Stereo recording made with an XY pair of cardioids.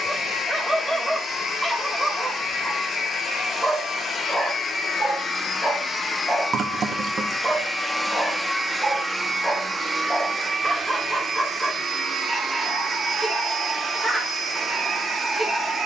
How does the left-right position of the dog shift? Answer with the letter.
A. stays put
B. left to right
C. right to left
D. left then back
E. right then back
A.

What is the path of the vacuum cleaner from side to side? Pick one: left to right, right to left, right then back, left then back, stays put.
left to right.